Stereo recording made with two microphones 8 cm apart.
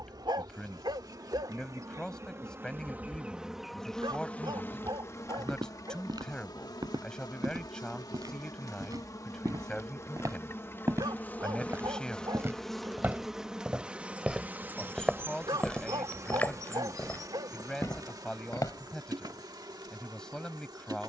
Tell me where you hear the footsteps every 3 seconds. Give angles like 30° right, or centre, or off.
off, 60° right, 60° right, 40° right, 20° right, 20° left, 50° left.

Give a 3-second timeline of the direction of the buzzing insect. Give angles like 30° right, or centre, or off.
50° right, 20° left, 50° left, 30° left, 10° right, 40° right, 60° right.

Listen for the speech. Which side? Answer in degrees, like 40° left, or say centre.
10° left.